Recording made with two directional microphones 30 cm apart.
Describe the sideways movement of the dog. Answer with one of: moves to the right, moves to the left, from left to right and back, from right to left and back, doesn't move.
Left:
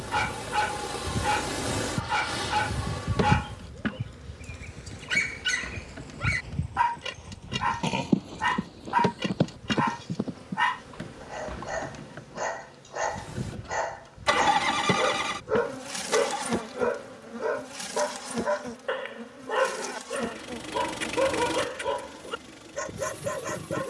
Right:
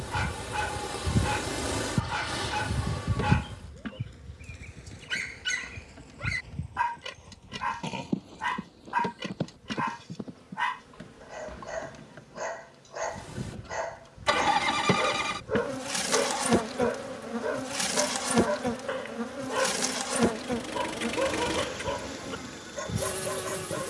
doesn't move.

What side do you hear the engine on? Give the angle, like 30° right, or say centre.
10° left.